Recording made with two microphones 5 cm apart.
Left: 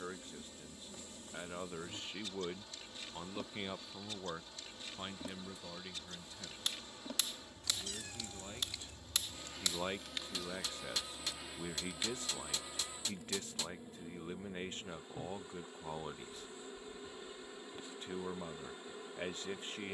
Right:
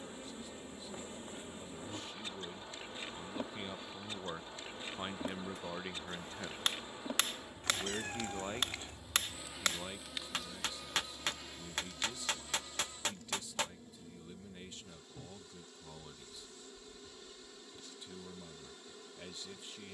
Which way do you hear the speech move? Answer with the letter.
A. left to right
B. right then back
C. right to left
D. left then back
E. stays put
B.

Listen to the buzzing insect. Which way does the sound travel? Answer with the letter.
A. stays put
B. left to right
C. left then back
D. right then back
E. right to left
E.